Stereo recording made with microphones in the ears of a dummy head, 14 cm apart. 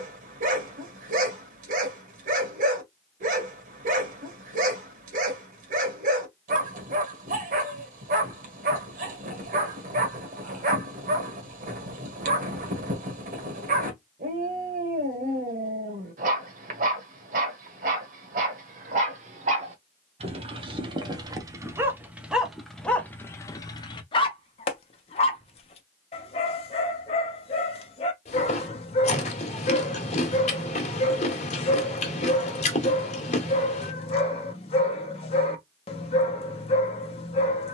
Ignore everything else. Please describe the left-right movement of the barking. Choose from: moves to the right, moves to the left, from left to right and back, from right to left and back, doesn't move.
moves to the left.